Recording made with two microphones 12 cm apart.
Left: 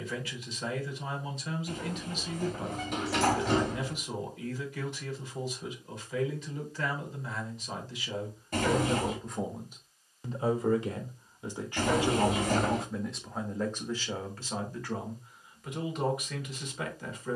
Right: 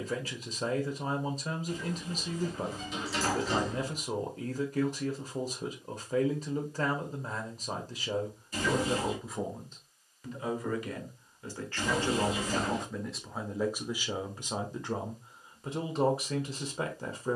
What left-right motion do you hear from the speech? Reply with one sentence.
You can hear the speech go left and come back.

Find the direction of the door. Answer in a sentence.
You can hear the door on the left.